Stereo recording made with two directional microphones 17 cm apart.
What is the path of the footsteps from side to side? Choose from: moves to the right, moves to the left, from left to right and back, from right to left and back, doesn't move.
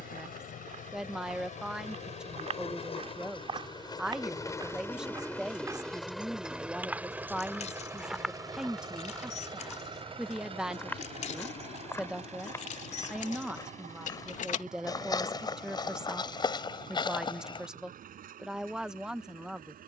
moves to the left.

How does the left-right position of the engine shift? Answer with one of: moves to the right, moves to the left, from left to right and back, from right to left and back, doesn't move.
moves to the right.